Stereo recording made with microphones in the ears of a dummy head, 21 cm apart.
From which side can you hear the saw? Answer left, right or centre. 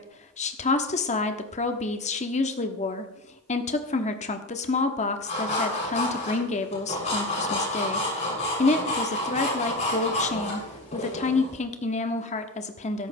left.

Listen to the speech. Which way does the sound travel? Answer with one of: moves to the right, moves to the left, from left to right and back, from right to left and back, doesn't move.
doesn't move.